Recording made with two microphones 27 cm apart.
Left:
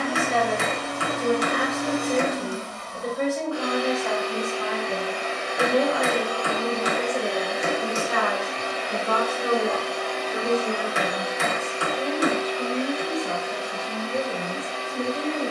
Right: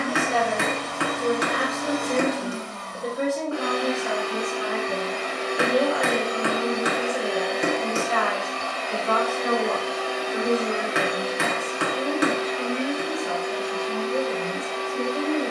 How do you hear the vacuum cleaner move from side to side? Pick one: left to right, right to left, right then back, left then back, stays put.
left then back.